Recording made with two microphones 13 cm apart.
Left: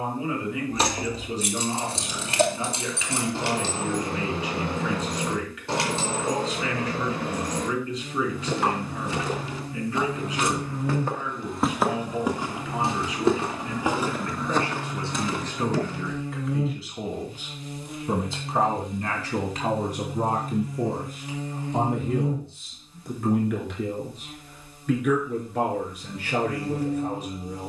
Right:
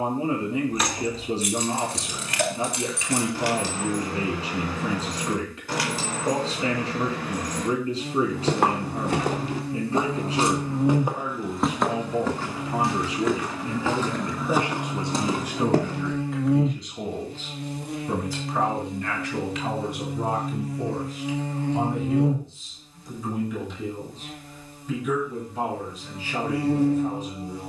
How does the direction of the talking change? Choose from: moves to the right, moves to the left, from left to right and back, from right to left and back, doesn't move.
moves to the left.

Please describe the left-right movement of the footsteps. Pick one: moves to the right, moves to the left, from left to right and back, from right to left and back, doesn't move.
from right to left and back.